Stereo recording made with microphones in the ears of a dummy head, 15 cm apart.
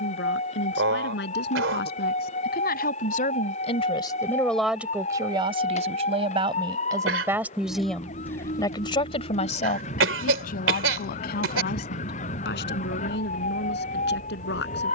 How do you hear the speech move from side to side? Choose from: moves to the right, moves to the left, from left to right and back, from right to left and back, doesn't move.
from left to right and back.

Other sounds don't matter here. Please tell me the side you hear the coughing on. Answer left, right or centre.
right.